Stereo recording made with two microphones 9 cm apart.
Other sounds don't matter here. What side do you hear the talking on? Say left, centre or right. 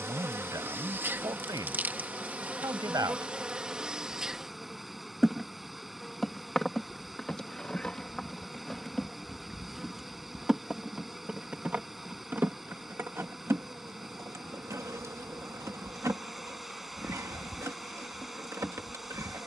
right.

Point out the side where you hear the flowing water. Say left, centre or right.
centre.